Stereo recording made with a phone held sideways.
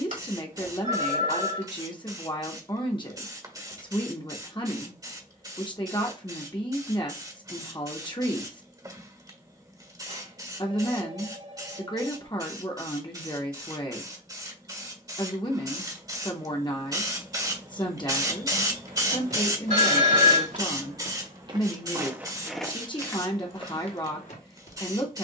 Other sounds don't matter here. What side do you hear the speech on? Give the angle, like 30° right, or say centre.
30° left.